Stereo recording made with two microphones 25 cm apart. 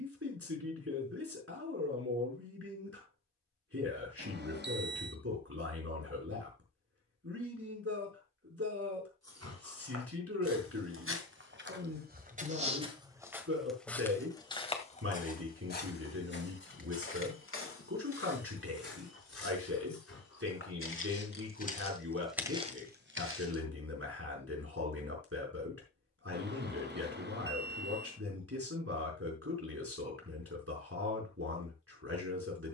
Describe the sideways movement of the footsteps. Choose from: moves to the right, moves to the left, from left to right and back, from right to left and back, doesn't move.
from right to left and back.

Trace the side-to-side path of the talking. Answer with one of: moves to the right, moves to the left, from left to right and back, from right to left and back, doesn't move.
doesn't move.